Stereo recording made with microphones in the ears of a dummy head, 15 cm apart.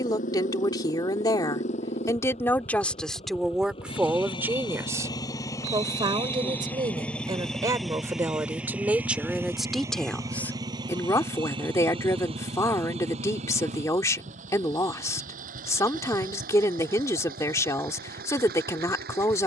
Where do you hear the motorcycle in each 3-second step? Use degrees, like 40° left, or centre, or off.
40° left, 30° left, centre, 20° right, 40° right, 50° right, 60° right.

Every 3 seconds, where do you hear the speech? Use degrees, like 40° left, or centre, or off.
20° left, 10° right, 20° right, 10° left, 20° left, 20° left, 20° left.